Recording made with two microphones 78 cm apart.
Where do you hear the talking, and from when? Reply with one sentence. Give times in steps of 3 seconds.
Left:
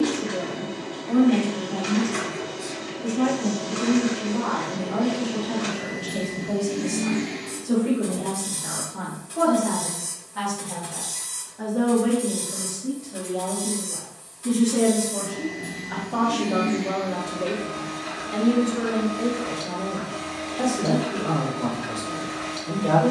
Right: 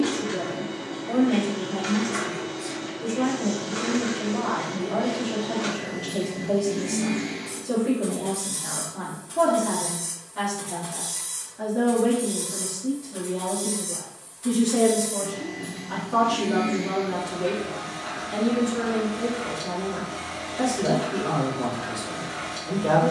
You can hear the talking on the left from 0 s, in the centre from 12 s and on the right from 15 s.